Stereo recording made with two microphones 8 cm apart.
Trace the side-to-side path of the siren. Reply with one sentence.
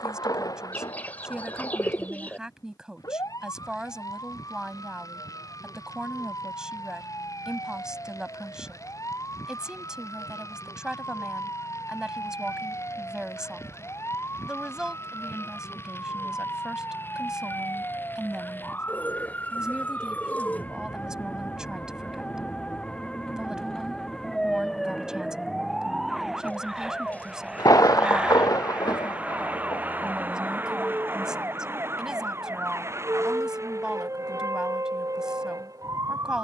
In this clip you hear the siren go from the left side to the right.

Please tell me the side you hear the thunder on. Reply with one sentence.
In this clip you hear the thunder on the left.